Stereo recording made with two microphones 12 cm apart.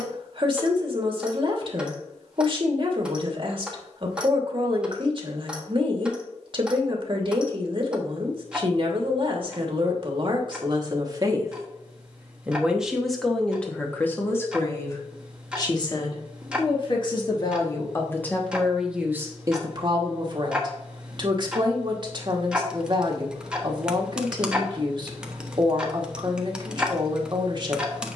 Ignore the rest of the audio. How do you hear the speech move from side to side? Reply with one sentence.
In this clip you hear the speech move from right to left and back again.